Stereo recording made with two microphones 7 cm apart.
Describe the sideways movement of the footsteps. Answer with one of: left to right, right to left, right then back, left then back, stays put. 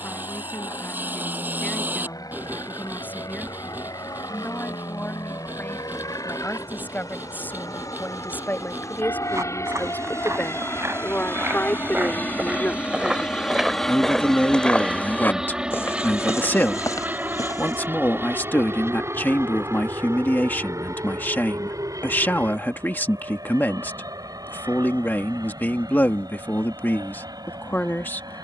right to left.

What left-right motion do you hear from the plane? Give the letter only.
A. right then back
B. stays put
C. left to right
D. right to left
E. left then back
C.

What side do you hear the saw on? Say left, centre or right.
right.